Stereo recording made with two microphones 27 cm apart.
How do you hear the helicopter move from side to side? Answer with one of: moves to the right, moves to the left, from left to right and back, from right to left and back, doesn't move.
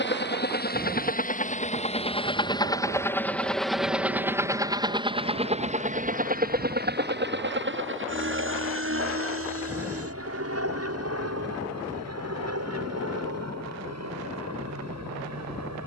moves to the right.